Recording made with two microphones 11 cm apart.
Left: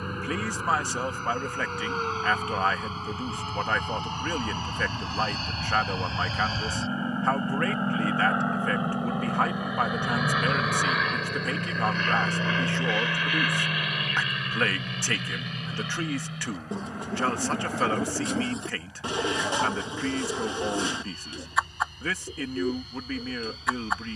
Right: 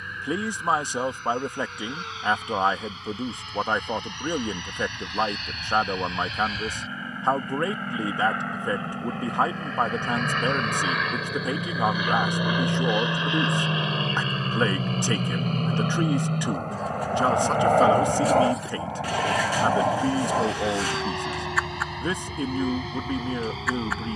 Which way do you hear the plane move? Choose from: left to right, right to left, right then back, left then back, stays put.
left to right.